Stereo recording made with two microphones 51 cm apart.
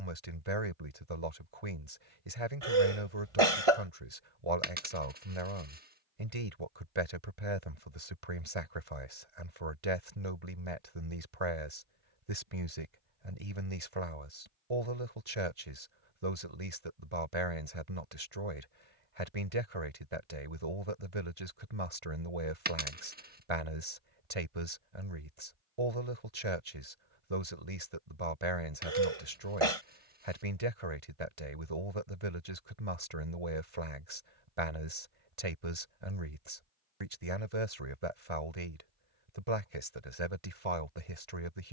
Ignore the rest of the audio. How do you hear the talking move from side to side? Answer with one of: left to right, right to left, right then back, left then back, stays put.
stays put.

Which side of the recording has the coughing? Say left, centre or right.
right.